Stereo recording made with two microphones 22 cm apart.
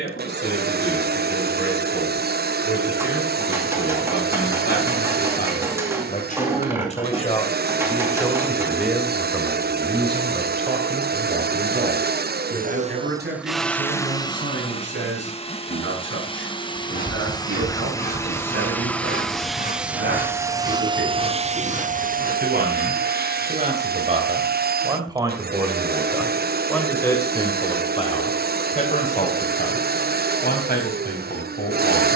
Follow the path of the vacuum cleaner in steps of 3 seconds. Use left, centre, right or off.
right, right, right, right, centre, left, centre, right, right, right, right.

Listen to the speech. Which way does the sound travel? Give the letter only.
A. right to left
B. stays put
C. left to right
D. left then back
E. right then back
E.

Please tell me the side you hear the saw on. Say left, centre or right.
left.